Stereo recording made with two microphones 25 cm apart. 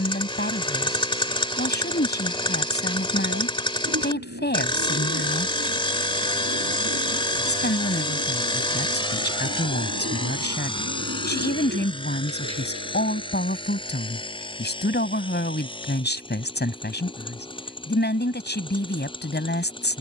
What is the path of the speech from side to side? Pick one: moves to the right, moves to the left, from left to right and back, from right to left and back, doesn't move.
doesn't move.